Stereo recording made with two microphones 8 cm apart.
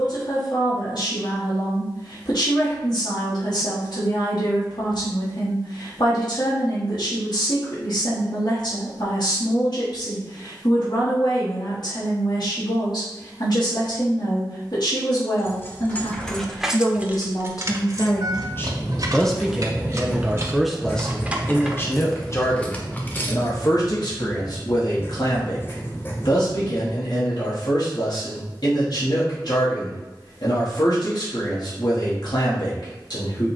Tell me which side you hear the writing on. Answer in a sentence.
In this clip you hear the writing on the left.